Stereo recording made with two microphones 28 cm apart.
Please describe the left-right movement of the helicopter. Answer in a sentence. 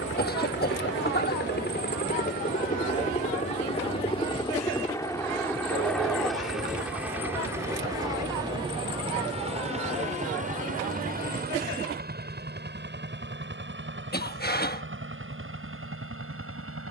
You can hear the helicopter move from left to right.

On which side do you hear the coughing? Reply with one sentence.
You can hear the coughing on the left.